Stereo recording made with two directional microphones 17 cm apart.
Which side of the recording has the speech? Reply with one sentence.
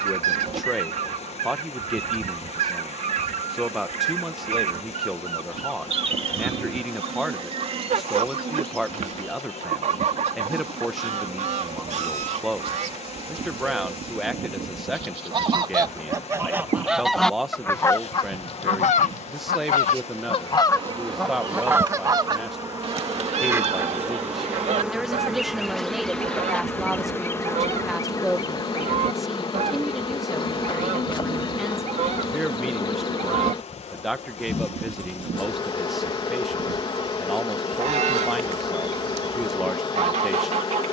In this clip you hear the speech in the centre.